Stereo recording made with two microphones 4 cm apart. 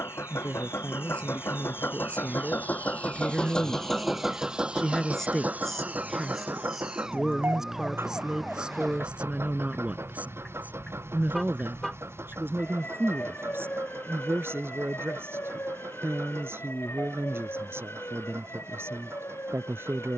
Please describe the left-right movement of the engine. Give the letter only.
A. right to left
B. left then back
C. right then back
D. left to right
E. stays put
D.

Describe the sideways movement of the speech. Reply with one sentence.
In this clip you hear the speech move to the right.